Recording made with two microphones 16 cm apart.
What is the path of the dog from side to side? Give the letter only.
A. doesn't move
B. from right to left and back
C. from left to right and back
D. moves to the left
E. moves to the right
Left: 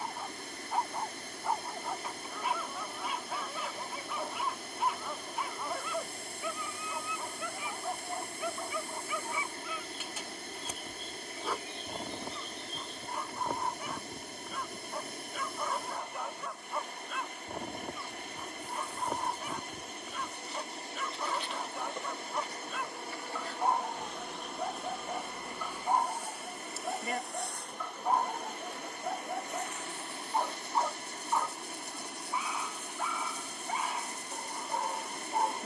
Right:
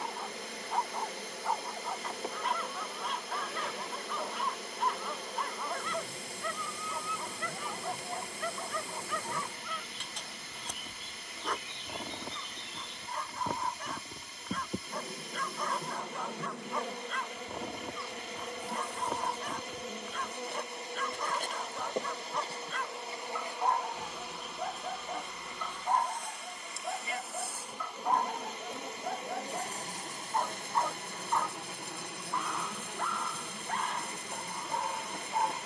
A.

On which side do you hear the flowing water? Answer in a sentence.
You can hear the flowing water on the left.